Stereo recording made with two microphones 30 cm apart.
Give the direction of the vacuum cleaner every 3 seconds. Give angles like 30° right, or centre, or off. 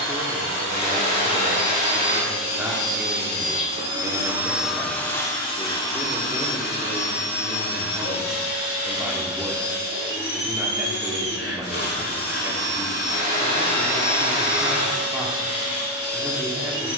50° right, centre, 40° left, 50° left, 50° left, 50° left.